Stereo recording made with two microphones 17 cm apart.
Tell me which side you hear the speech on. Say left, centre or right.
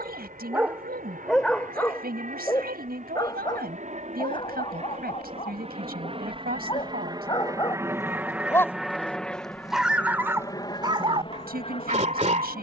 right.